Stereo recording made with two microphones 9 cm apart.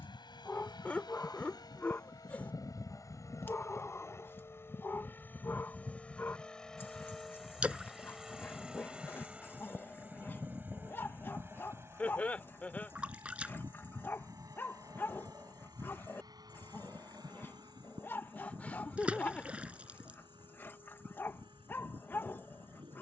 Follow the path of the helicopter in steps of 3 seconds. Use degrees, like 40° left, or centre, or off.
50° left, 30° left, centre, 20° right, 30° right, 40° right, 50° right, 50° right.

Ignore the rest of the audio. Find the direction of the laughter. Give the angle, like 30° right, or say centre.
10° left.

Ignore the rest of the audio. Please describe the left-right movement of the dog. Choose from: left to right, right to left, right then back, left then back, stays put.
stays put.